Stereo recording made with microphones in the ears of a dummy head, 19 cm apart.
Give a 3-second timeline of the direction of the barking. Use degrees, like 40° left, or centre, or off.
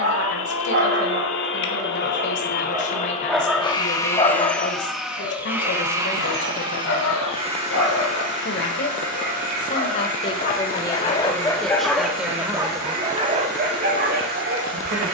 40° right, 20° left, 60° left, 30° left, 30° right.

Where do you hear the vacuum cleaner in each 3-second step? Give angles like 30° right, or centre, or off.
50° left, 10° left, 30° right, 40° right, 50° right.